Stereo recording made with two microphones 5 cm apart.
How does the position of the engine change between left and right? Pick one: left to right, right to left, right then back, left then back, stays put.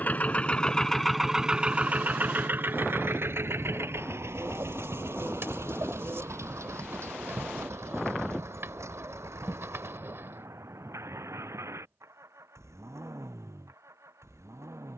left to right.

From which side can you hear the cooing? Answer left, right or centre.
right.